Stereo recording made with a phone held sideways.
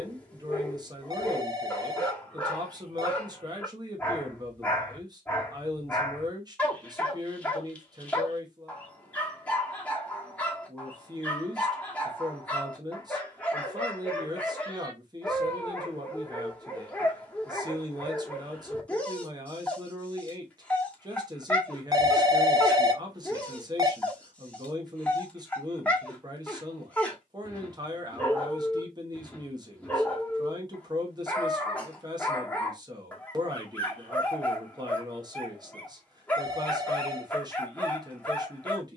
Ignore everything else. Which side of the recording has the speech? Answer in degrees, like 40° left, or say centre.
30° right.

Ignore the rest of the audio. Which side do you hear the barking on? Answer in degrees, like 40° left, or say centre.
10° left.